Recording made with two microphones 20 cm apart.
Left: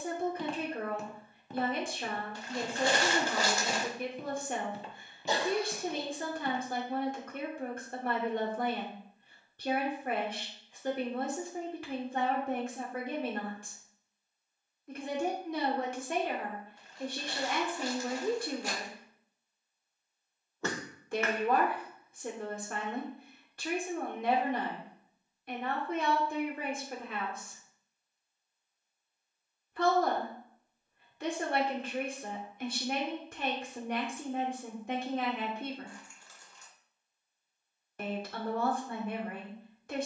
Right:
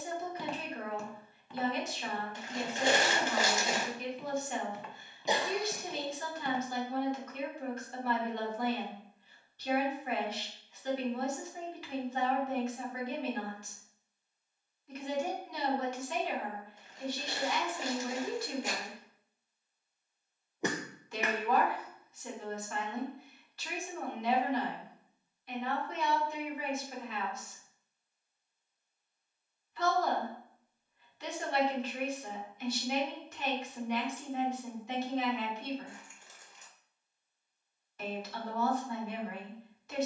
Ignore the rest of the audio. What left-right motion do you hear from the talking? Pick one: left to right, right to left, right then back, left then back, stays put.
stays put.